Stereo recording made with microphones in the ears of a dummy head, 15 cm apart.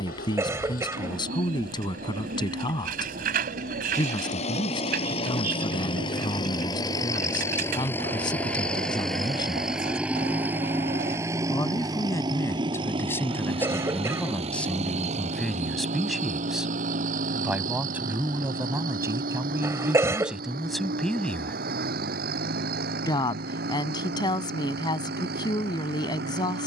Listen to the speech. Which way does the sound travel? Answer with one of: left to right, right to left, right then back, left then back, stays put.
right then back.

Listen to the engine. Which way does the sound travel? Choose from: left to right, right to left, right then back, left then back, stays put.
left to right.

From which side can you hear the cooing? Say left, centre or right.
right.